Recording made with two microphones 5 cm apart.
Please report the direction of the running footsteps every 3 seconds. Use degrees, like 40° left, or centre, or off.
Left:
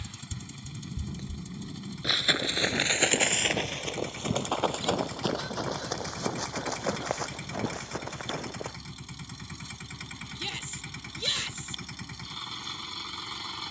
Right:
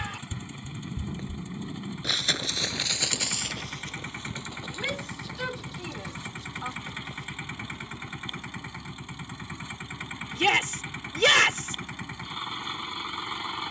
10° right, 60° left, 80° left, off, off.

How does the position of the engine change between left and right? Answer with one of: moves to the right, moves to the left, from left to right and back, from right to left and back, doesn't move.
doesn't move.